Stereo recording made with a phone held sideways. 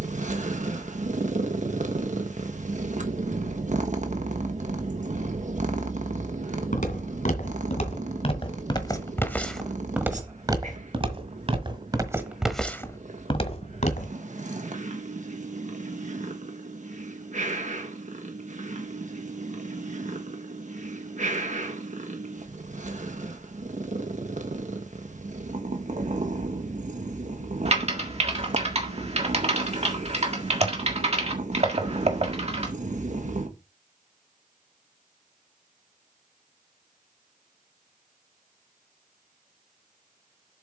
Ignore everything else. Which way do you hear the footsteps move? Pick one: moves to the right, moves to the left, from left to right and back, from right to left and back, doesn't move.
from left to right and back.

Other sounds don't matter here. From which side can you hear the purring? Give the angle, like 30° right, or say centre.
50° right.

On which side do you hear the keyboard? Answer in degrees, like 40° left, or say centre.
40° right.